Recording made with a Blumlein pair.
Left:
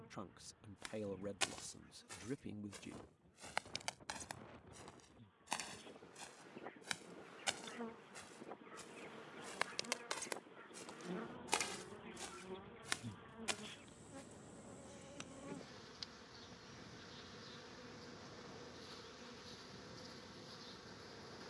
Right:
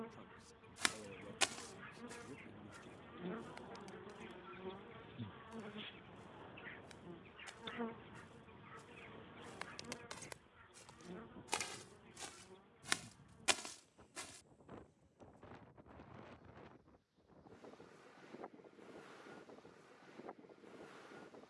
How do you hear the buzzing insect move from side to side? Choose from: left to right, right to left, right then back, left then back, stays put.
right to left.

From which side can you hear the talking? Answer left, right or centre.
left.